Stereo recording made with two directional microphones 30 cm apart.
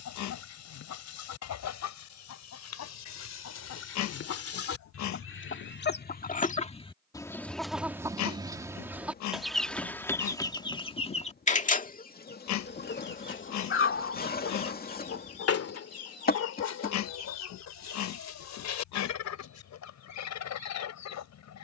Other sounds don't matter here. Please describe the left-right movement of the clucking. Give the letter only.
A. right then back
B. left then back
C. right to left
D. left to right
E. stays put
A.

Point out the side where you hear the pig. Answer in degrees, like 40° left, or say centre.
70° left.